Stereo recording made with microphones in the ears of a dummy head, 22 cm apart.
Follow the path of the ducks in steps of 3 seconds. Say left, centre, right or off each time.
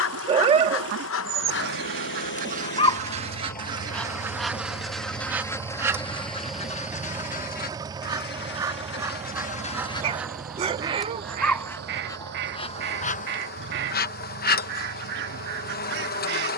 right, centre, left, centre, right, right.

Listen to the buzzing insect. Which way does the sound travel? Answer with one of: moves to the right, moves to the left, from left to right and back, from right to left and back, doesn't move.
from left to right and back.